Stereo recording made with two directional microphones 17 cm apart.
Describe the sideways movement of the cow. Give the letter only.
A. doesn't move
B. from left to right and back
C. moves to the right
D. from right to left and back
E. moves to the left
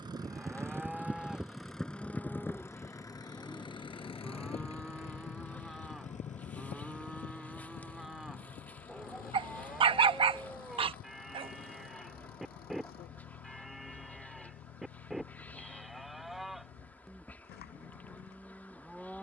A.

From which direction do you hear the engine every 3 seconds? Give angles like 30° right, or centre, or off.
centre, 30° left, 50° left, 60° left, 60° left, 70° left, 70° left.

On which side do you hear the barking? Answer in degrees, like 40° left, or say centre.
30° right.